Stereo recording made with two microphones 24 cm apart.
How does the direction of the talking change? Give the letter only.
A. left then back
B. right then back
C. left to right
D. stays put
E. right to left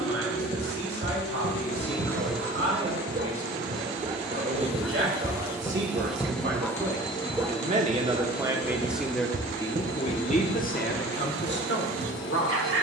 E.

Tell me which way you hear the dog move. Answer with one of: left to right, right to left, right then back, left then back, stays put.
left then back.